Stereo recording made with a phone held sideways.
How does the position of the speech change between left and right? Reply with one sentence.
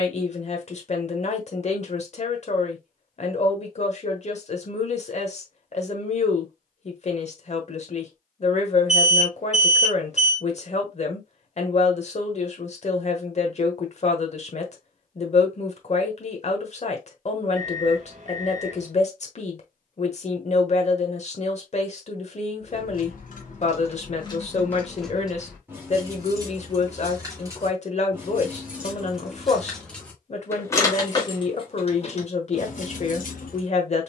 In this clip you hear the speech stay put.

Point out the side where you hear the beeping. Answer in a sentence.
In this clip you hear the beeping on the right.